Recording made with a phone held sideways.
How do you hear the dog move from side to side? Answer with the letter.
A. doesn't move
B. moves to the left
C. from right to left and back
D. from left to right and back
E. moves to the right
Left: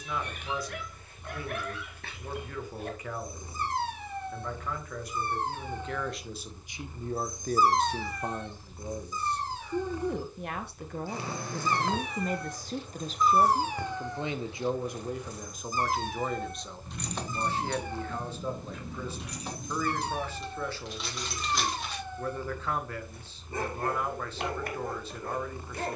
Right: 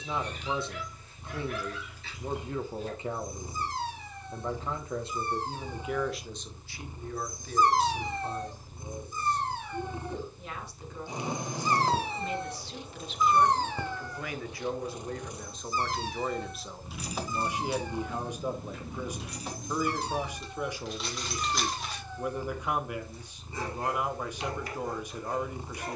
D.